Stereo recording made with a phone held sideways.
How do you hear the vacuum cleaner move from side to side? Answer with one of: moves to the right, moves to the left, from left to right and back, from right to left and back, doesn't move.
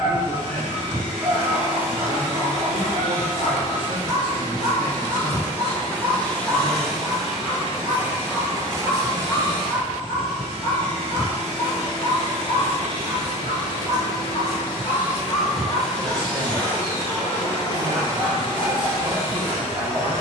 from left to right and back.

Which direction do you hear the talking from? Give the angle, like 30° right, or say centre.
40° right.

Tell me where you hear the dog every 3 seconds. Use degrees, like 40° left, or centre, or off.
20° right, 20° right, centre, 30° left, 40° left, 10° right, 20° right.